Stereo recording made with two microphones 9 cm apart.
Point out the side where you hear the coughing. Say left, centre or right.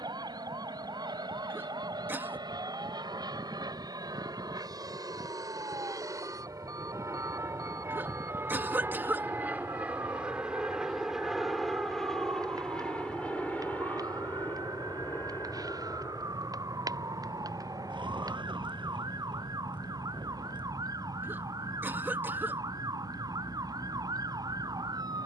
right.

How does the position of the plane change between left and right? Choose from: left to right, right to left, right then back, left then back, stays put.
right to left.